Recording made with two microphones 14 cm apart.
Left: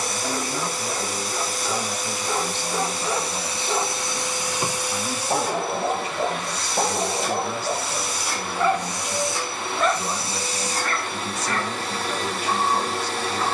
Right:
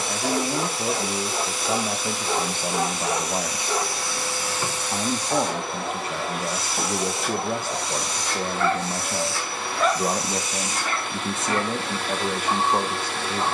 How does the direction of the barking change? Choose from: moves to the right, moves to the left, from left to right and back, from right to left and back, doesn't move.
from right to left and back.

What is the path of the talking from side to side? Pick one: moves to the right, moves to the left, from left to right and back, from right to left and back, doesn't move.
doesn't move.